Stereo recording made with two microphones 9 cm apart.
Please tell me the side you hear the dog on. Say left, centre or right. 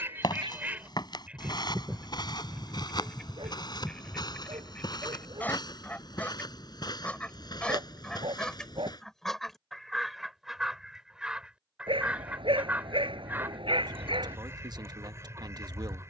right.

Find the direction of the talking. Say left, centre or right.
right.